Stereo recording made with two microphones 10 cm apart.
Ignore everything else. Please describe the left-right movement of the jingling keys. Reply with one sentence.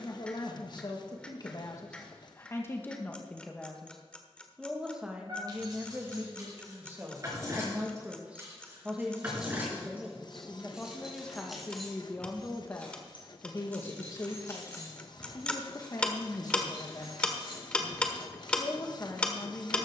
In this clip you hear the jingling keys go from the right side to the left.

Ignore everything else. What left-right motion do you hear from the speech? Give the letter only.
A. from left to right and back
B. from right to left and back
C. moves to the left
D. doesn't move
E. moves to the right
A.